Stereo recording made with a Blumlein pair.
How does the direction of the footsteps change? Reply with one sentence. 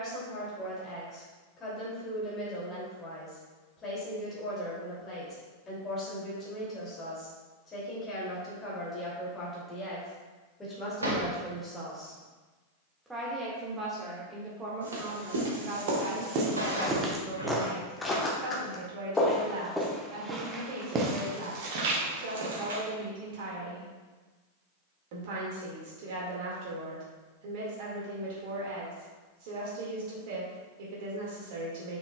In this clip you hear the footsteps move from right to left and back again.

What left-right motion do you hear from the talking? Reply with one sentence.
You can hear the talking move from left to right.